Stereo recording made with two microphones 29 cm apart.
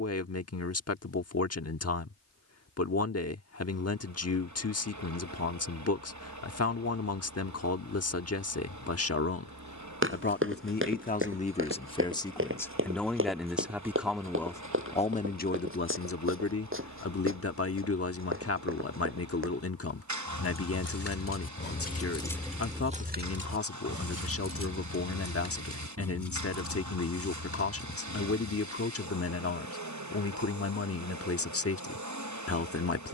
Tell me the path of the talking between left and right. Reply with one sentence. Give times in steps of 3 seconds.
You can hear the talking on the left from 0 s, in the centre from 12 s and on the left from 15 s.